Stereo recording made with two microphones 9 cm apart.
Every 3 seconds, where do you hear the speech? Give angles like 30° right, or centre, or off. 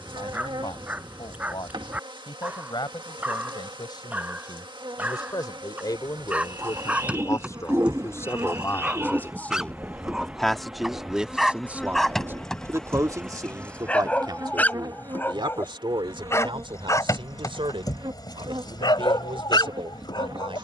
60° left, 50° left, 30° left, centre, 40° right, 70° right, 70° right.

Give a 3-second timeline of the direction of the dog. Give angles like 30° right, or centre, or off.
20° right, 20° right, 10° right, centre, 10° left, 30° left, 50° left.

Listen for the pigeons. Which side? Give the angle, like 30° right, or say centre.
30° right.